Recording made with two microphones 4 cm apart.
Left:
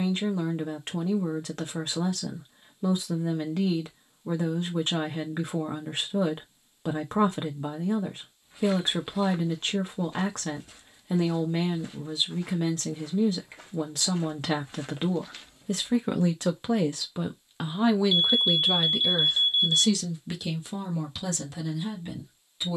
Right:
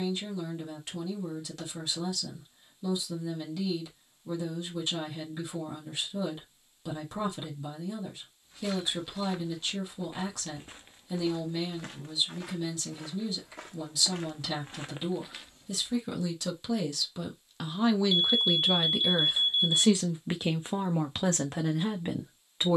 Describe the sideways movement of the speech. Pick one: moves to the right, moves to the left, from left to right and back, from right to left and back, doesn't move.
moves to the right.